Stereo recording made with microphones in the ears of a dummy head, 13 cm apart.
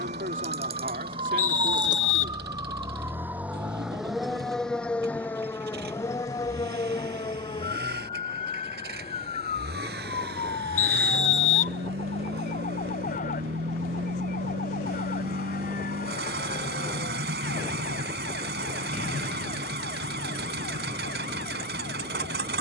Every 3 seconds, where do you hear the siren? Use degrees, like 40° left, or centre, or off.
30° right, centre, 30° left, 40° left, 50° left, 60° left, 60° left, 60° left.